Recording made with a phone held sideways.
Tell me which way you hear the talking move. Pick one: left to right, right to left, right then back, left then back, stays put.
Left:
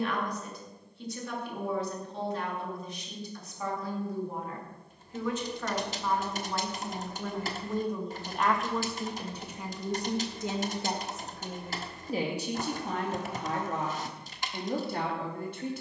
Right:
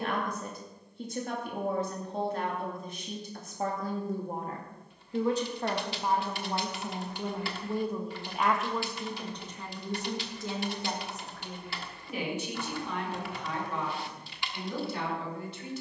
right to left.